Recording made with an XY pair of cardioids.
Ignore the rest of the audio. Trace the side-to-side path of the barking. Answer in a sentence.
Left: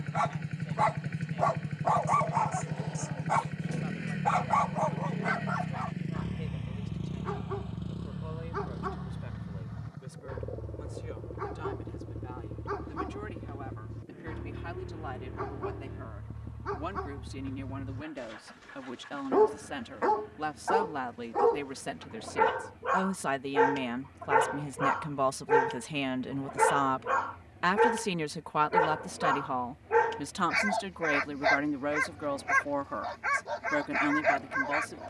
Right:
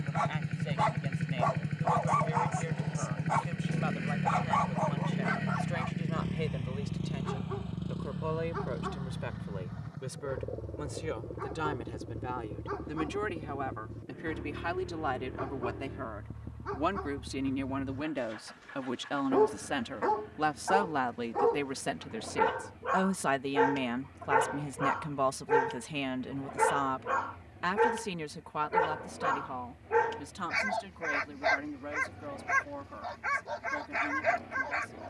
In this clip you hear the barking stay in one place.